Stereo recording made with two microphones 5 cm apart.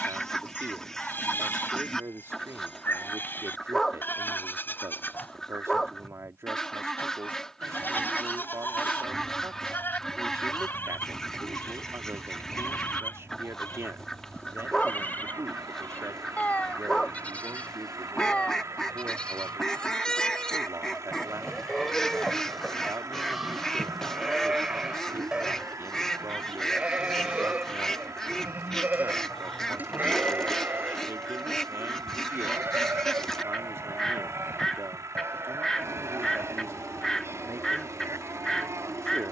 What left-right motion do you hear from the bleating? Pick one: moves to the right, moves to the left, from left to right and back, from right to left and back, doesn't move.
moves to the right.